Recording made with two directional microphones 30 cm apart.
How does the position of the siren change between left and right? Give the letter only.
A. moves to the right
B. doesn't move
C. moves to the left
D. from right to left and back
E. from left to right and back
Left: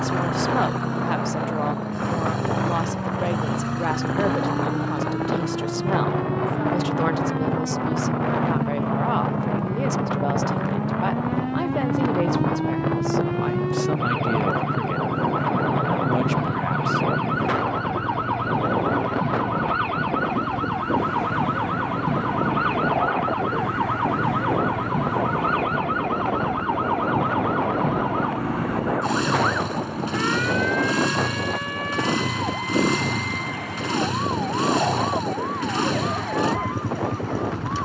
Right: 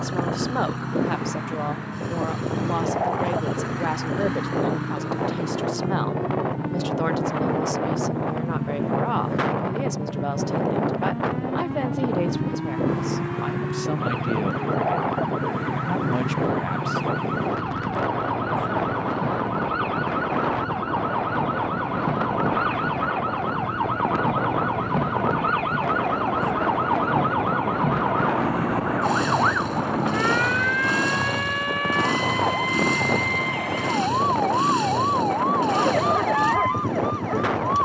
A.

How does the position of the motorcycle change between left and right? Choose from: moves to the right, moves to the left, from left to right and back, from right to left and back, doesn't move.
doesn't move.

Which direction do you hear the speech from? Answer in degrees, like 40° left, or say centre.
10° left.